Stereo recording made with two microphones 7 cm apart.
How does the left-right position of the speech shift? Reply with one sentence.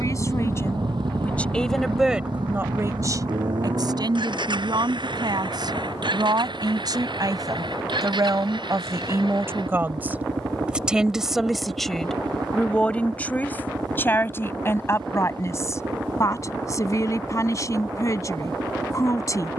You can hear the speech go right and come back.